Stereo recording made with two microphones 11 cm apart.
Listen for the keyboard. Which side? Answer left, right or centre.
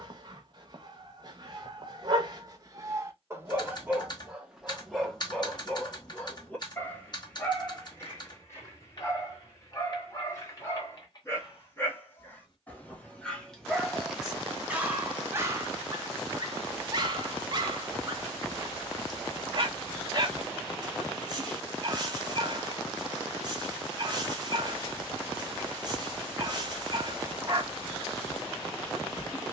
left.